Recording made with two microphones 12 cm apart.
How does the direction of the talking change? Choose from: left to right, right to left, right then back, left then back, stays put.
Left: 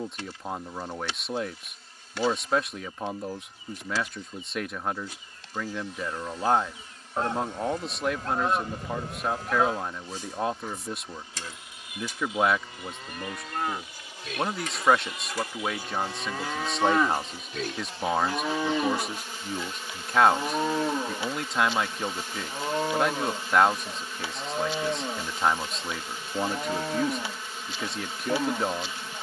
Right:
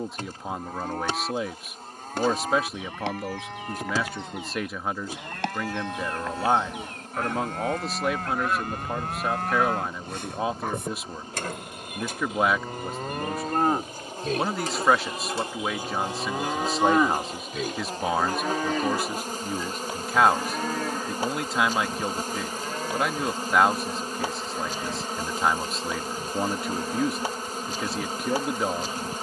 stays put.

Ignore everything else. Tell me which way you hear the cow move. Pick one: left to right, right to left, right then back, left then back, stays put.
right to left.